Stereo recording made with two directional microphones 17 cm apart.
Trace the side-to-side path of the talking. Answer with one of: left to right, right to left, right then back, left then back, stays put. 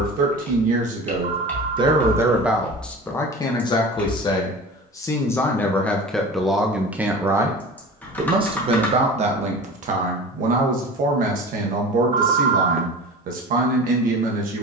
left then back.